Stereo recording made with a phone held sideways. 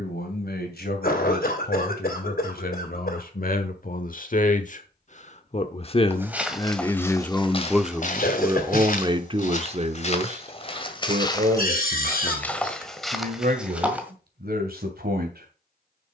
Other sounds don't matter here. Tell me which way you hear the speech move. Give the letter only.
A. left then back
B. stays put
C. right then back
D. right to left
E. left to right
E.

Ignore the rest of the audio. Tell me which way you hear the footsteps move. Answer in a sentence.
You can hear the footsteps go left and come back.